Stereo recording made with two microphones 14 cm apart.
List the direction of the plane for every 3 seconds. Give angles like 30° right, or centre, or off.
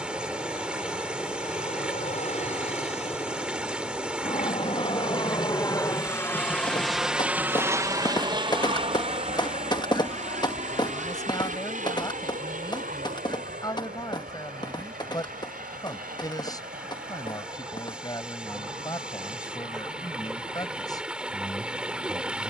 70° left, 50° left, 10° right, 60° right, 70° right, 70° right, 80° right, 80° right.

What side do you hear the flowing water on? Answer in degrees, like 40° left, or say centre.
10° right.